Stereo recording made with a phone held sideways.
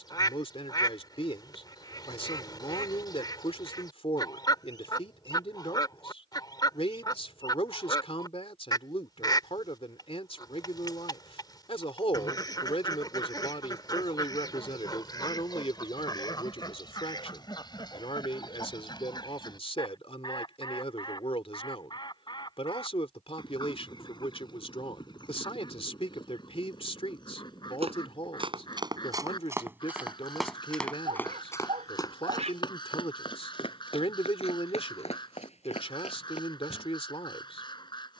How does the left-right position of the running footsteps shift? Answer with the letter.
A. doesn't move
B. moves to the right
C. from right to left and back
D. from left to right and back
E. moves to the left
E.